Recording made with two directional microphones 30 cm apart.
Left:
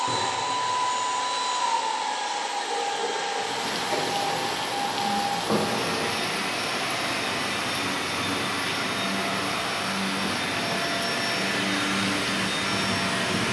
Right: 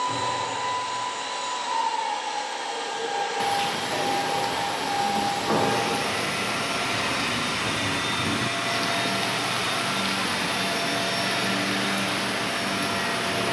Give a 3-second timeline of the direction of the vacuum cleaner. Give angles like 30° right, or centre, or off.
50° left, 20° left, 10° right, centre, 50° left.